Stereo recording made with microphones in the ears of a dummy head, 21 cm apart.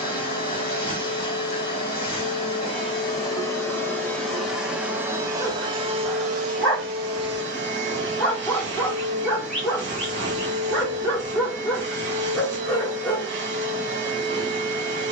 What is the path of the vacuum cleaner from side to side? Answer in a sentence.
In this clip you hear the vacuum cleaner move from left to right.